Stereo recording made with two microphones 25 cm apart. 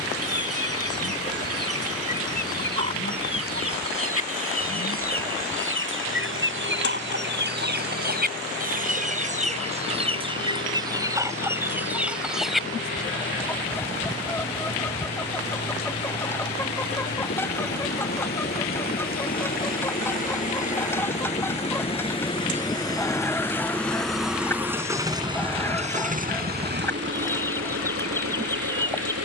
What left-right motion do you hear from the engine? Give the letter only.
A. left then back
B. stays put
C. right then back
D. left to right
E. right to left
D.